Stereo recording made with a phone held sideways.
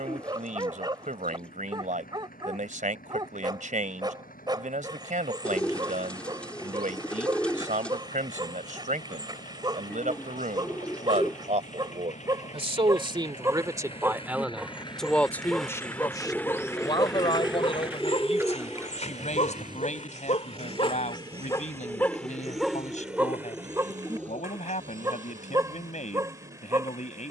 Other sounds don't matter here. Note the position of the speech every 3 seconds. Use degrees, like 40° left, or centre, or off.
60° right, 60° right, 60° right, 60° right, 30° right, 30° left, 50° left, 60° left, 60° left.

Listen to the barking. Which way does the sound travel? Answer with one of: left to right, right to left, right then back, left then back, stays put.
left then back.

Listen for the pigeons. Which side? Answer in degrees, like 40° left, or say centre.
10° left.